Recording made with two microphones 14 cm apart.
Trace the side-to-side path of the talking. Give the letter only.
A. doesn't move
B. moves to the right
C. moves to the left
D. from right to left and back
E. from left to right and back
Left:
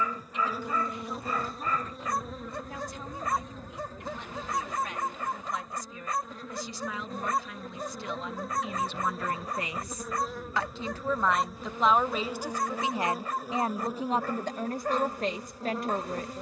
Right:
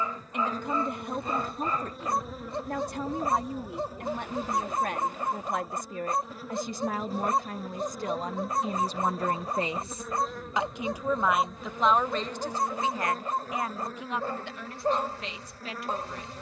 C.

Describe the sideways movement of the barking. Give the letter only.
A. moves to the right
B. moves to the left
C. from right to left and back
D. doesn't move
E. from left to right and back
D.